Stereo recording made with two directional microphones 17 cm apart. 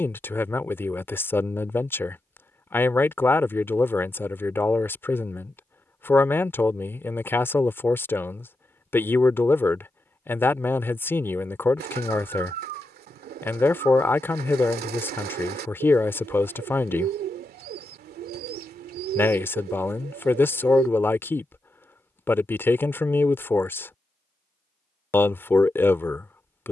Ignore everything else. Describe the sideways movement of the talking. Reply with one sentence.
You can hear the talking stay in one place.